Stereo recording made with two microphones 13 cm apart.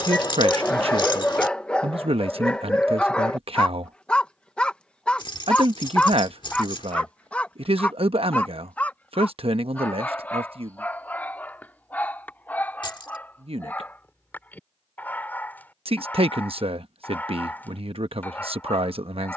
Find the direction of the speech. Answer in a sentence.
You can hear the speech on the right.